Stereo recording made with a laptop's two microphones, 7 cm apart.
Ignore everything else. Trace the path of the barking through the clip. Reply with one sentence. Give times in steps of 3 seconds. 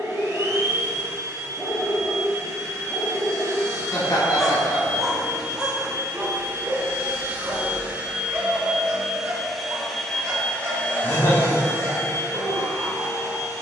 You can hear the barking on the left from 0 s, in the centre from 3 s and on the right from 6 s.